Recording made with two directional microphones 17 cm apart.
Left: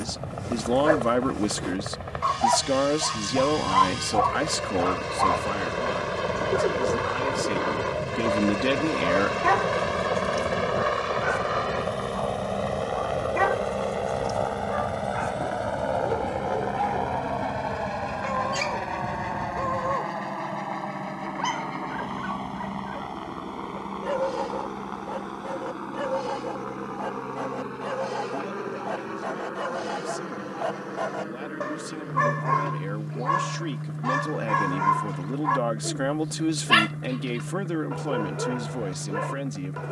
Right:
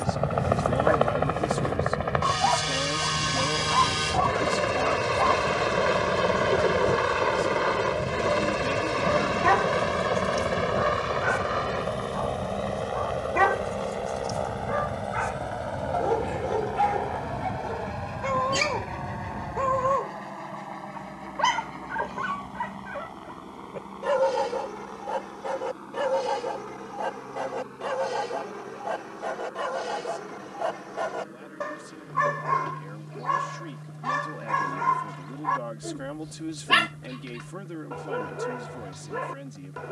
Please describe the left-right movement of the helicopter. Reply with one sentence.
You can hear the helicopter move to the left.